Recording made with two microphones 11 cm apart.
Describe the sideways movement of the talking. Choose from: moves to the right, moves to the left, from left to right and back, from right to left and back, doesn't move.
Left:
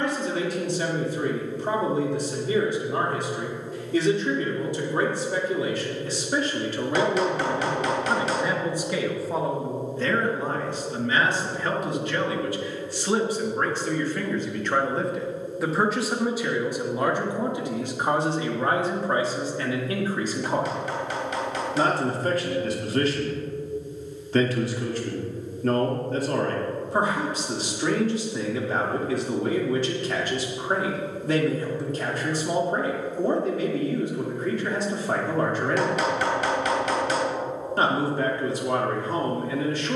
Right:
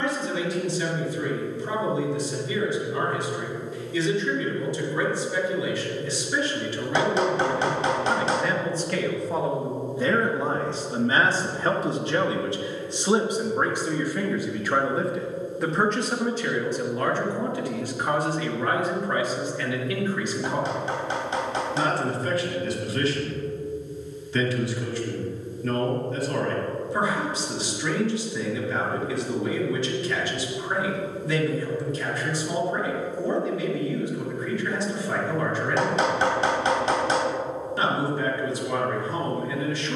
from left to right and back.